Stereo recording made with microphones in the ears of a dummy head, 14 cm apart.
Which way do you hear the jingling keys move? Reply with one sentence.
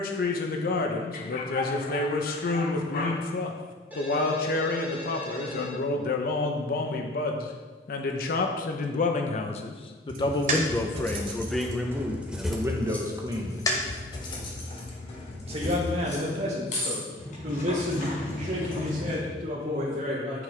In this clip you hear the jingling keys move to the left.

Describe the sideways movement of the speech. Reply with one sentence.
In this clip you hear the speech travel towards the right.